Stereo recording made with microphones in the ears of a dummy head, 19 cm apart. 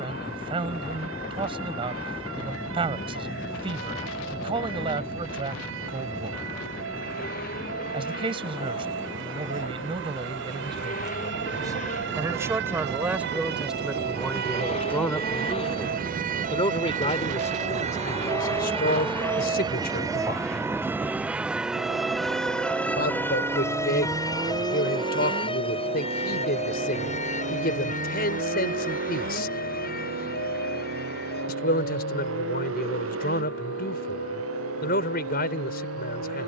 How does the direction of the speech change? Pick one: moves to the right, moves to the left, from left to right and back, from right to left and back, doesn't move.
moves to the left.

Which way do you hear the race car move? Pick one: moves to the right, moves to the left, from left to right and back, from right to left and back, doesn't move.
moves to the right.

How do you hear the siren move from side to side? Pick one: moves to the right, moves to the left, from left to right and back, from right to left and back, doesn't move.
moves to the left.